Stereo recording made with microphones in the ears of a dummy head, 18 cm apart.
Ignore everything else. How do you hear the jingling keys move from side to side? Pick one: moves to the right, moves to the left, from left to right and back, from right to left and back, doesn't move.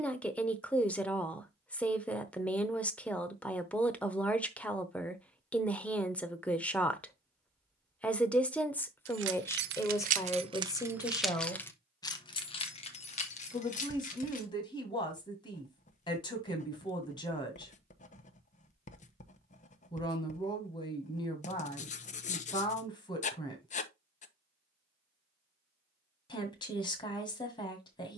moves to the left.